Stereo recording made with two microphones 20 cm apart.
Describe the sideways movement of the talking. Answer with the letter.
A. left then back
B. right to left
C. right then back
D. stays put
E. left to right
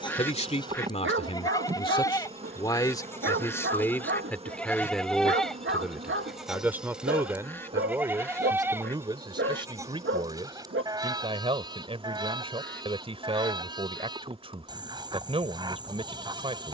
E.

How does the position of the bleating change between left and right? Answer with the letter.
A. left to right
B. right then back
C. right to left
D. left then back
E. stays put
A.